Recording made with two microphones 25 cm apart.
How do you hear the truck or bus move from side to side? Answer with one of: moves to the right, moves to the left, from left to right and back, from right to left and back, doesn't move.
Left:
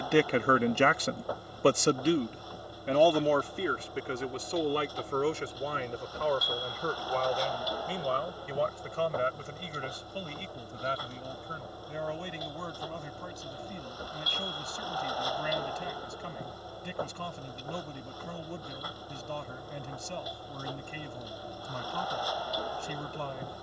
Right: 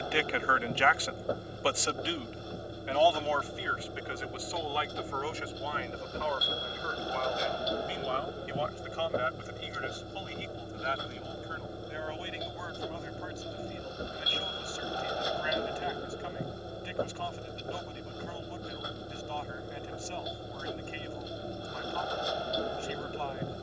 doesn't move.